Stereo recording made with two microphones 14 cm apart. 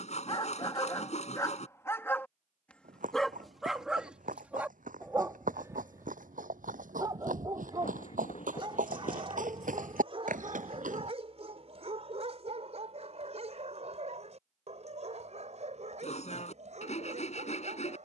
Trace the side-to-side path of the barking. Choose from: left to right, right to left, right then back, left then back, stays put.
left to right.